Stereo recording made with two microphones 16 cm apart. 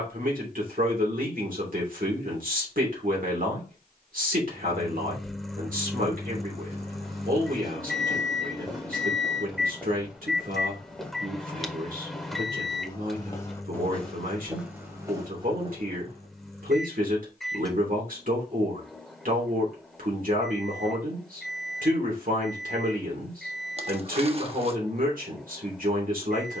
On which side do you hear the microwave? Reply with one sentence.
In this clip you hear the microwave in the centre.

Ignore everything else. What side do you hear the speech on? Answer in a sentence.
You can hear the speech on the right.